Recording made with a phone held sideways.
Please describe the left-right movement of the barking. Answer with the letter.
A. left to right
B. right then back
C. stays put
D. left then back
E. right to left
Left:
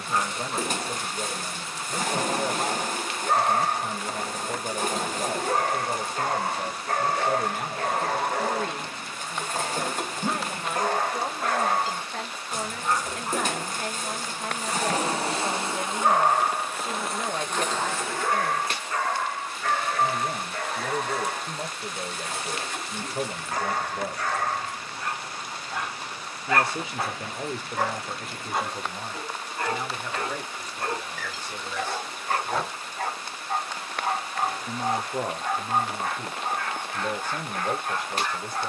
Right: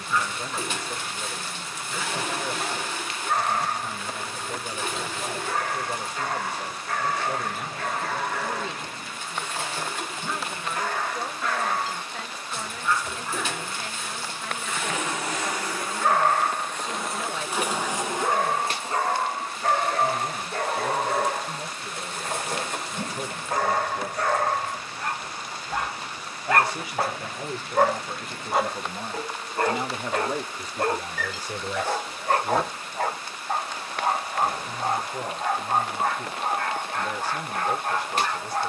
A.